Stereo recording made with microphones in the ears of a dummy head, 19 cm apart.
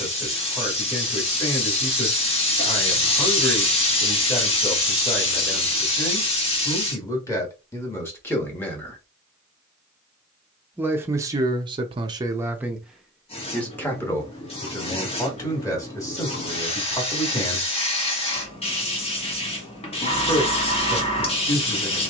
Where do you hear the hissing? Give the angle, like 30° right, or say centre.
30° left.